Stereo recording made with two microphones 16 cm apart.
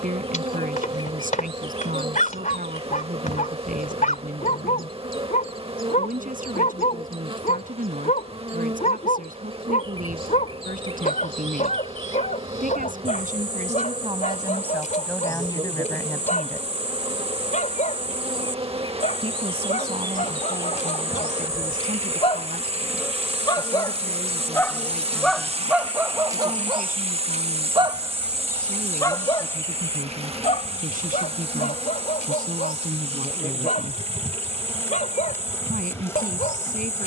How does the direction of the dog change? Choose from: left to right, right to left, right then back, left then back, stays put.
right then back.